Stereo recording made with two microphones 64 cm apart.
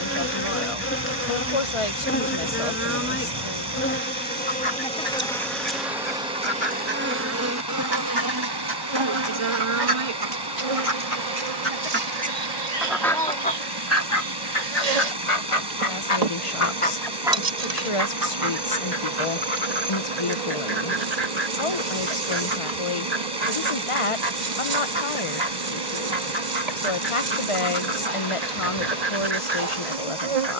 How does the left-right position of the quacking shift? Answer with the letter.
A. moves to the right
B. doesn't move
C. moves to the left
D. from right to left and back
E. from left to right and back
D.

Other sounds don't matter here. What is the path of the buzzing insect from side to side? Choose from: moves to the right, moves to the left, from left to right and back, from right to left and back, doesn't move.
moves to the right.